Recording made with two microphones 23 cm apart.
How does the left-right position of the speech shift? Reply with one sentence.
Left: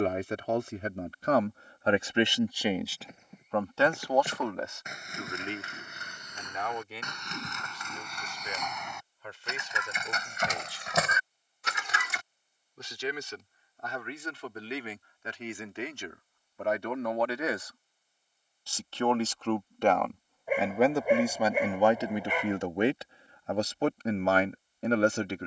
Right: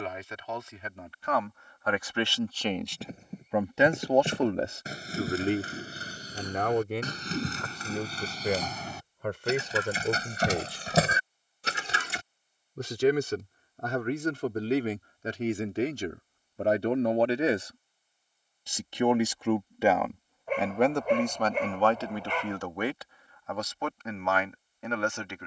In this clip you hear the speech move from left to right and back again.